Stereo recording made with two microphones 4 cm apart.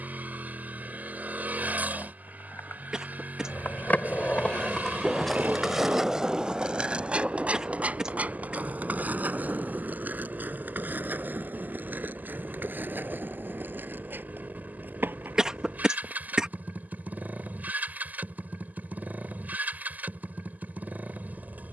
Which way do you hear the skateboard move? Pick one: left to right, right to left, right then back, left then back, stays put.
left to right.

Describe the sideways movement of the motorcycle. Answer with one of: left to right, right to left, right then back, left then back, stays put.
stays put.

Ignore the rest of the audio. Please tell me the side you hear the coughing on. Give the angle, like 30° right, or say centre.
20° right.